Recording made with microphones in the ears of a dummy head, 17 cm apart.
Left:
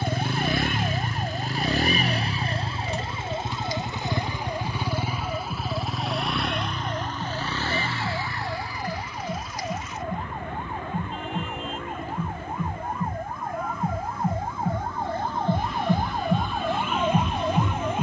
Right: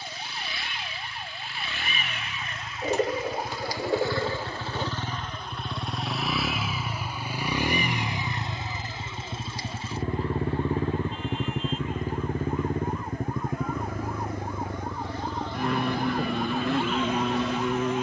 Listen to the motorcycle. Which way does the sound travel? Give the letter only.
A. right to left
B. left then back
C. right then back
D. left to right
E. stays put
D.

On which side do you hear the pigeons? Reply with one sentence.
In this clip you hear the pigeons on the right.